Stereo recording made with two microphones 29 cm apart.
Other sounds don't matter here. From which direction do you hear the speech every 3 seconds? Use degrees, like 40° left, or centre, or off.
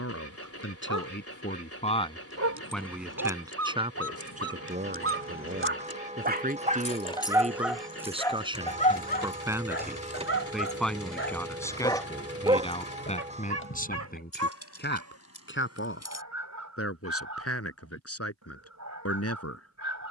30° left, 20° right, 20° right, centre, 30° left, 50° left, 60° left.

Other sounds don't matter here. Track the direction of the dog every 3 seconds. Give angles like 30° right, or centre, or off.
70° right, 50° right, 10° right, 40° left, 50° right, 70° right, 70° right.